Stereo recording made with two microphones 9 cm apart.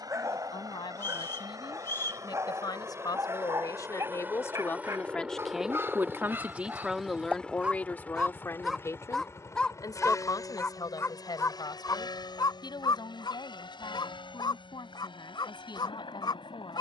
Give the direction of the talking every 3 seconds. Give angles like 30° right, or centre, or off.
60° left, 30° left, 10° left, 50° left, 60° left, 60° left.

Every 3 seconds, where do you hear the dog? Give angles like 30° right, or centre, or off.
30° right, 30° right, 20° right, 20° left, 60° left, 60° left.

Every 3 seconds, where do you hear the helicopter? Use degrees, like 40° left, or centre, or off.
40° right, 20° right, 10° left, 40° left, 60° left, 60° left.